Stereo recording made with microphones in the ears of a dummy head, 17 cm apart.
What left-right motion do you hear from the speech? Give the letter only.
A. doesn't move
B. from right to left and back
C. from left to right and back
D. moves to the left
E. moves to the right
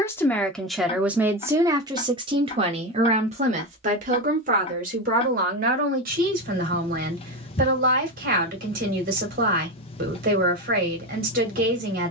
E.